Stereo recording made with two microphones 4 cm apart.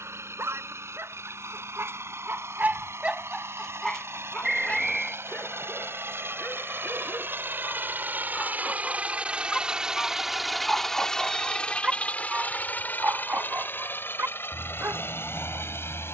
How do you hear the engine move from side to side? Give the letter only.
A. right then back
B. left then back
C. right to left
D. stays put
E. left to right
C.